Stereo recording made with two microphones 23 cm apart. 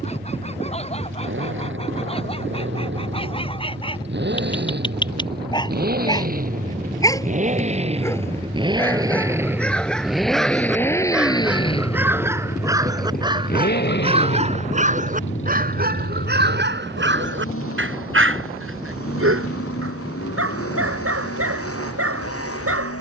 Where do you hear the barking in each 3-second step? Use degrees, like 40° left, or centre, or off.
30° left, 20° left, 10° left, centre, 20° right, 50° right, 70° right, 80° right.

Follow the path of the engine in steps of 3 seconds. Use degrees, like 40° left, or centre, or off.
60° right, 50° right, 30° right, centre, 40° left, 60° left, 80° left, 80° left.